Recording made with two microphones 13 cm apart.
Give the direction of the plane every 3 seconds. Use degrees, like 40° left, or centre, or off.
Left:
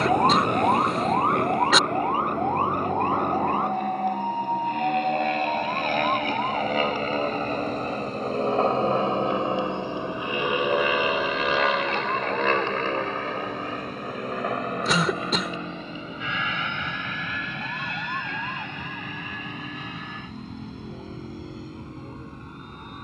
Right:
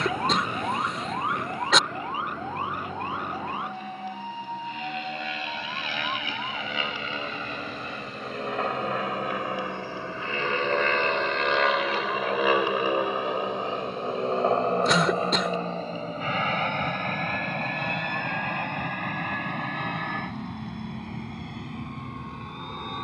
70° left, 60° left, 40° left, 10° left, 20° right, 40° right, 50° right, 60° right.